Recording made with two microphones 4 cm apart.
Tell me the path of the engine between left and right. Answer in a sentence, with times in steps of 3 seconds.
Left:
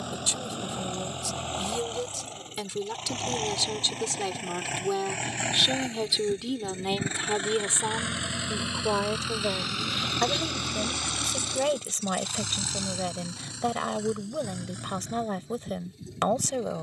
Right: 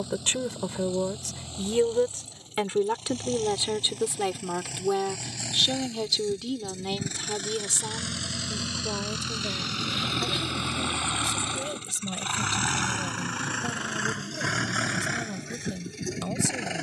In this clip you hear the engine on the left from 0 s, in the centre from 9 s and on the right from 12 s.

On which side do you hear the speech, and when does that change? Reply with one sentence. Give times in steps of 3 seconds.
You can hear the speech on the right from 0 s, in the centre from 3 s and on the left from 6 s.